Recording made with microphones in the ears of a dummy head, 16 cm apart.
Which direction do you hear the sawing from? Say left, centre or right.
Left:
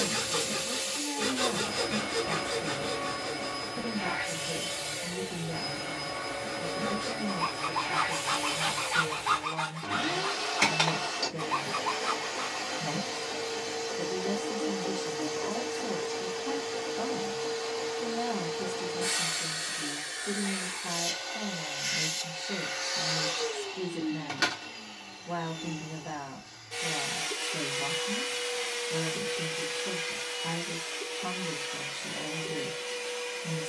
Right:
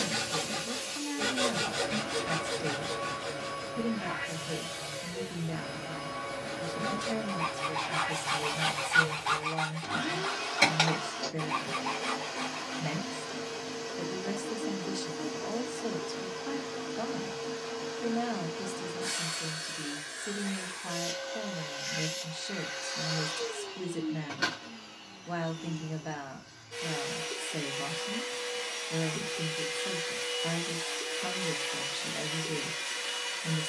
centre.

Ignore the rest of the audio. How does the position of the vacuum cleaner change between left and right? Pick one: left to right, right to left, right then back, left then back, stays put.
left to right.